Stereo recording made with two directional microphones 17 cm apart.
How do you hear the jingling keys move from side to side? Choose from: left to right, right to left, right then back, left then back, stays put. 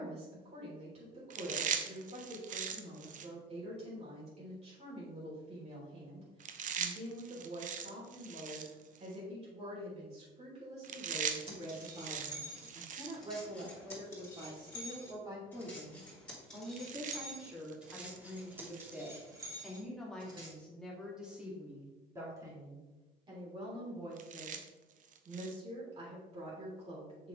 left then back.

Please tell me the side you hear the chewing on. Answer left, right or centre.
right.